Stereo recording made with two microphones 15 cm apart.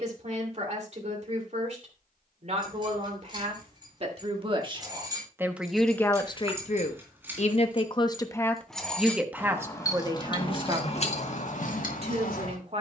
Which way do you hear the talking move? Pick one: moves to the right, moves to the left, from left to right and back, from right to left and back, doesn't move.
from right to left and back.